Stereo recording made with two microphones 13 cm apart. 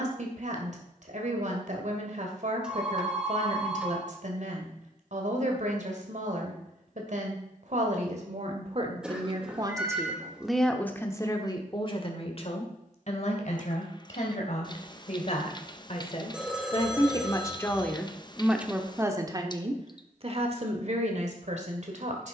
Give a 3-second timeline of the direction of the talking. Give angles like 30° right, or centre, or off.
60° right, 60° right, 60° right, centre, 50° left, 40° left, 30° right, 60° right.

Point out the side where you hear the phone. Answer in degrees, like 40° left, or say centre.
10° right.